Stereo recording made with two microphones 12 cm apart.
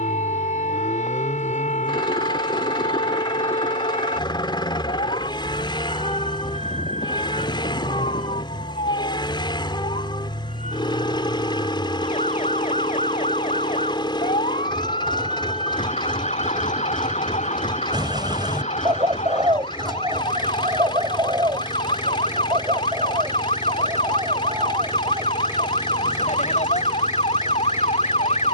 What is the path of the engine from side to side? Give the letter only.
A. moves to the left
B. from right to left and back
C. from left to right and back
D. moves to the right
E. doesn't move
E.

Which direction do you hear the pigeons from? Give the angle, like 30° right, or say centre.
40° right.